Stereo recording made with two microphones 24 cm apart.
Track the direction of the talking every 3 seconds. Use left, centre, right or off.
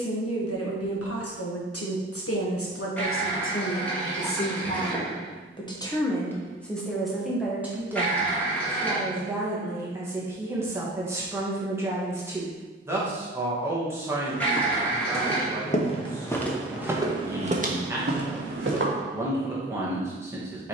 left, left, centre, centre, centre, centre, centre.